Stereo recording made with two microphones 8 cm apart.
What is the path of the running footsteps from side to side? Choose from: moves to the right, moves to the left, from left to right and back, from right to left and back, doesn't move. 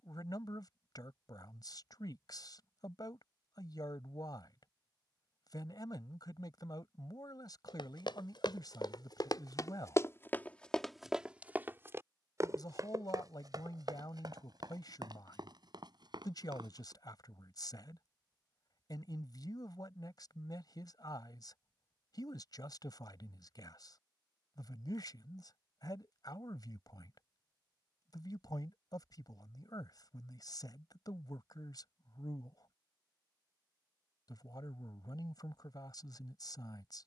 moves to the right.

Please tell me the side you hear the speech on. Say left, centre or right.
left.